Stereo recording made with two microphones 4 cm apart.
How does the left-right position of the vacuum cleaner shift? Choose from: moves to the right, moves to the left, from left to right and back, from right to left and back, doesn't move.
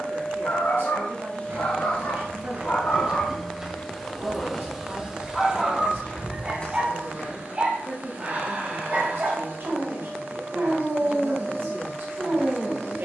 moves to the right.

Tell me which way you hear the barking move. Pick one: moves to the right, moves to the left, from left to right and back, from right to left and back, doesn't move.
moves to the right.